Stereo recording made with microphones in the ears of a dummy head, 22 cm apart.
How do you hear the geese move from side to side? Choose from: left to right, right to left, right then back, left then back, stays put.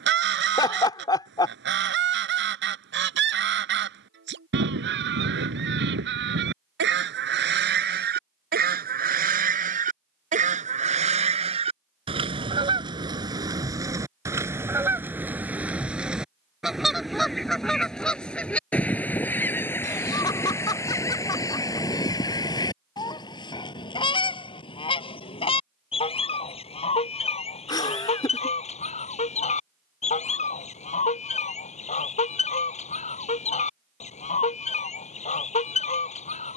right to left.